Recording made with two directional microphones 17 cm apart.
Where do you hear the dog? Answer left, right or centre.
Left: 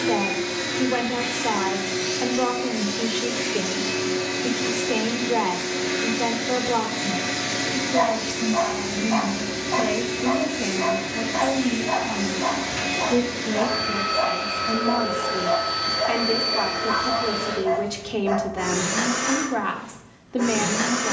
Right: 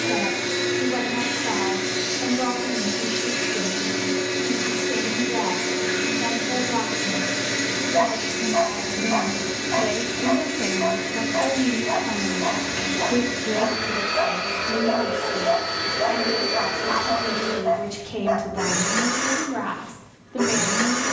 centre.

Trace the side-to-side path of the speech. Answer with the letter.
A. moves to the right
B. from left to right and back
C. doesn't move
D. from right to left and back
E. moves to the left
B.